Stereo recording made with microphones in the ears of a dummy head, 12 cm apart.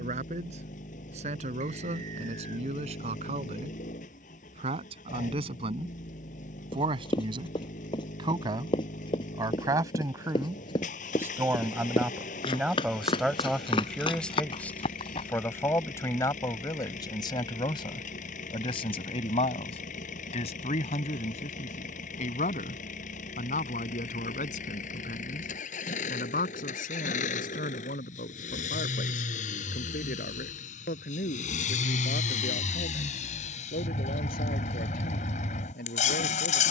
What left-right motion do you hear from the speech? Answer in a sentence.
In this clip you hear the speech move from right to left.